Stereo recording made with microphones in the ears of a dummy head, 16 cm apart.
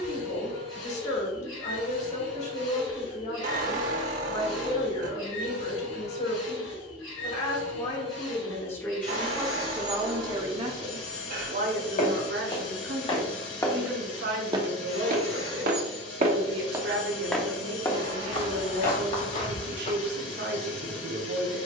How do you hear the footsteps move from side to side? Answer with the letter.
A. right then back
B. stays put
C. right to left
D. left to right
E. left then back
A.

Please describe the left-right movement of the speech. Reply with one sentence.
In this clip you hear the speech move to the right.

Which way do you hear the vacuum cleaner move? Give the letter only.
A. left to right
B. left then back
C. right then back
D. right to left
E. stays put
E.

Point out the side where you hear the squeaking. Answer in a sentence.
You can hear the squeaking on the right.